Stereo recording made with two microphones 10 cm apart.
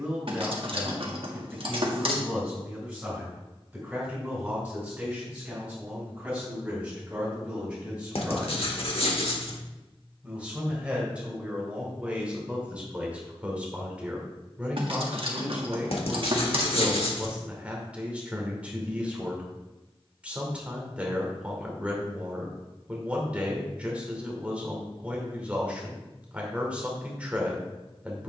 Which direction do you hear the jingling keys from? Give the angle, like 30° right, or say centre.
60° right.